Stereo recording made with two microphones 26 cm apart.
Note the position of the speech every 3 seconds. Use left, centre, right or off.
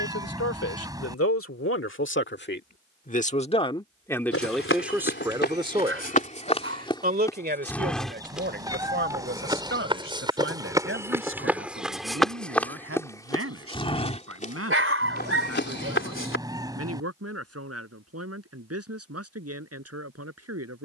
left, centre, right, right, right, right, right.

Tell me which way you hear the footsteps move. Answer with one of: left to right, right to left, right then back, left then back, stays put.
right then back.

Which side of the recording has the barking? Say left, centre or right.
right.